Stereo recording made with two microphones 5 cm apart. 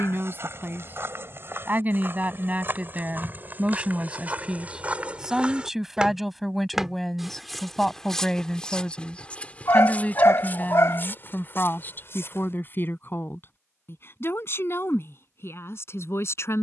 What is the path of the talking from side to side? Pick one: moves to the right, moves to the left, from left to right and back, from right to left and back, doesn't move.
moves to the left.